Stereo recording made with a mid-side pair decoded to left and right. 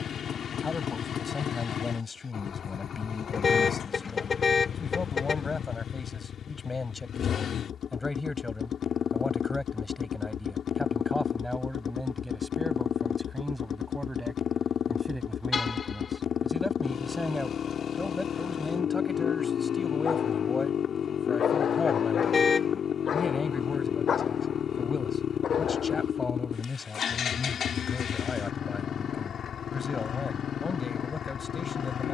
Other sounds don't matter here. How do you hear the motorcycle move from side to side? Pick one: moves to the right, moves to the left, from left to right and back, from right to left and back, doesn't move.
doesn't move.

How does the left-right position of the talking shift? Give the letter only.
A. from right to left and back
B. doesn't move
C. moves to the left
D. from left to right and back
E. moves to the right
D.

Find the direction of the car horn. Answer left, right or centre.
left.